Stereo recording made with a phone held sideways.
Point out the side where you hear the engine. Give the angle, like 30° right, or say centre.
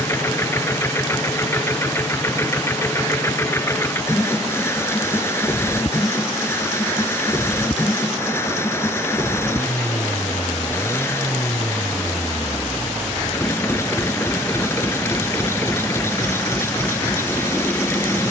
20° left.